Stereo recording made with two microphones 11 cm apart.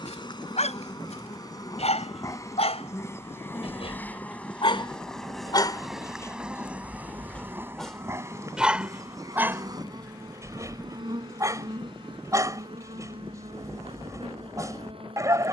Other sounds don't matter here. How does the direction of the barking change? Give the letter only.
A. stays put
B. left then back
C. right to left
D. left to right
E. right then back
D.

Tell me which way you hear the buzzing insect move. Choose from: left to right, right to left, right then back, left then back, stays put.
left to right.